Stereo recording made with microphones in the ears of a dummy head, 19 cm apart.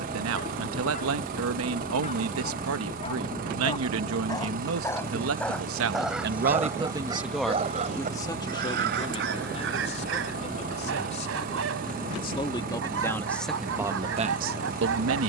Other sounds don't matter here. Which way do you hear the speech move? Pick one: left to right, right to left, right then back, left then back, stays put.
left then back.